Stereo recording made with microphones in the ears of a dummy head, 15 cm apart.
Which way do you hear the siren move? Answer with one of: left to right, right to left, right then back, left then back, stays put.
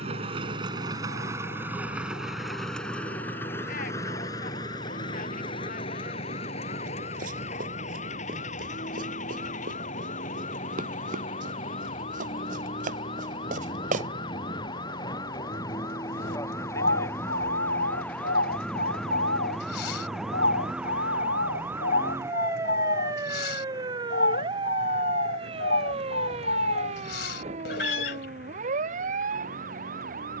left to right.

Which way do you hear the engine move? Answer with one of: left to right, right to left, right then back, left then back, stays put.
right to left.